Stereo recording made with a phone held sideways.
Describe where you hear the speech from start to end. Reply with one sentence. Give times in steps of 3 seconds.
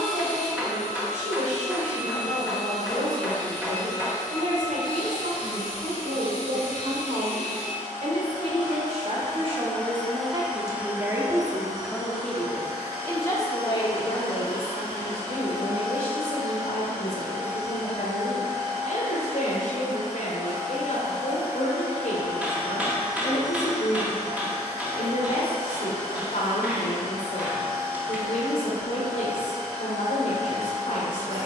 You can hear the speech on the right from 0 s and on the left from 12 s.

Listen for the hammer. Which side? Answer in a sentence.
You can hear the hammer in the centre.